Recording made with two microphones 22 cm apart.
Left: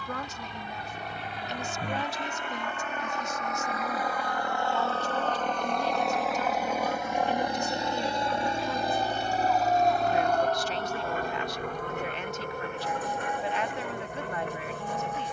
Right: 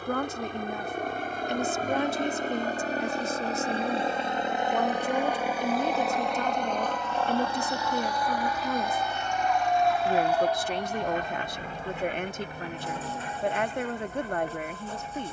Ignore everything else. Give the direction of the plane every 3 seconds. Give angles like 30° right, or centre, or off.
50° right, 20° right, 20° left, 40° left, 50° left.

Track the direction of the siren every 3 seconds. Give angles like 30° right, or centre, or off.
80° left, 60° left, 30° left, 10° right, 40° right.